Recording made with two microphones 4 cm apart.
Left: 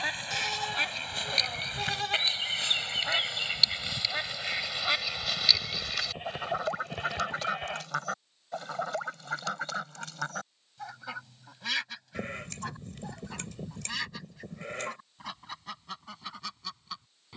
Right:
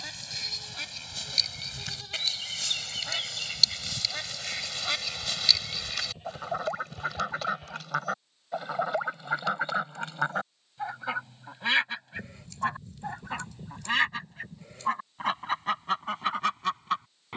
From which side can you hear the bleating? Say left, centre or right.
left.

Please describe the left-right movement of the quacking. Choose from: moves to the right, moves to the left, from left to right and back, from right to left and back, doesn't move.
moves to the right.